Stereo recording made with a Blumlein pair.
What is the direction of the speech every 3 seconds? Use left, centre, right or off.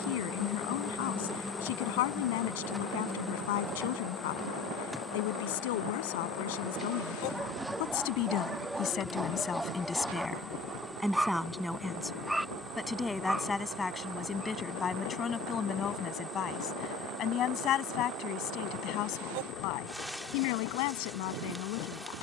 left, left, left, centre, centre, left, left, left.